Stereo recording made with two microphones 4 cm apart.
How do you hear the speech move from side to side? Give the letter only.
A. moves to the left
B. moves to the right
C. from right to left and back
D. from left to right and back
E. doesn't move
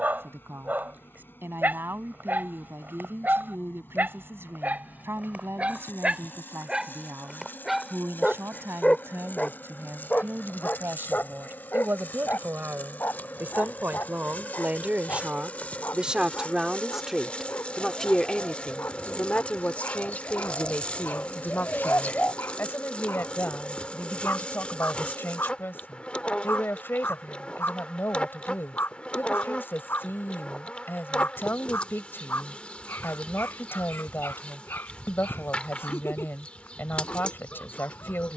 A.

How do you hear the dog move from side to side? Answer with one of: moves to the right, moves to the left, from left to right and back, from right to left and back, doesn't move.
moves to the left.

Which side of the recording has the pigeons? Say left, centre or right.
left.